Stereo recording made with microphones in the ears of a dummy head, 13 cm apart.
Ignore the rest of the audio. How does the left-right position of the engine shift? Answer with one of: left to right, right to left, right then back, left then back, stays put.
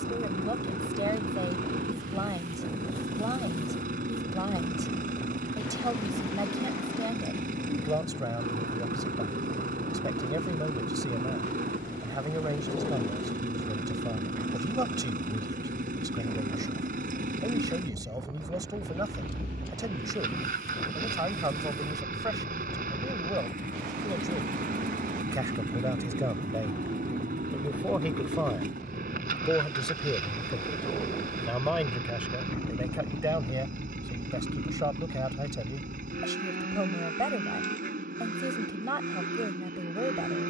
stays put.